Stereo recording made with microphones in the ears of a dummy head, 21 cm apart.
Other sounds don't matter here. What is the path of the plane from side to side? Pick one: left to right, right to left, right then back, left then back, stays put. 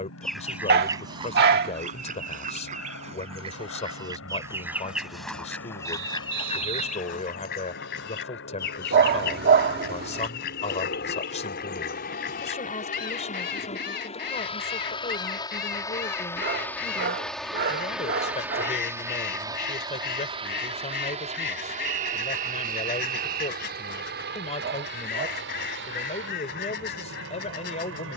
left to right.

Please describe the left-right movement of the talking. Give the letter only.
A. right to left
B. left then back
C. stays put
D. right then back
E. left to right
C.